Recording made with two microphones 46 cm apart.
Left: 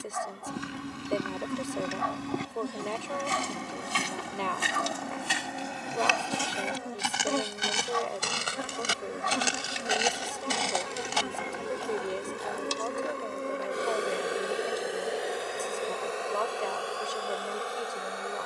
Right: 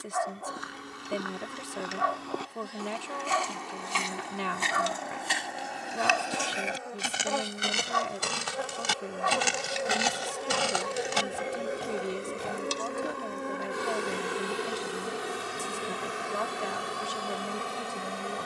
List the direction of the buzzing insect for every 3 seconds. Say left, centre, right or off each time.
left, left, left, left, centre, right.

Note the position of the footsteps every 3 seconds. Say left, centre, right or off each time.
left, left, centre, right, right, off.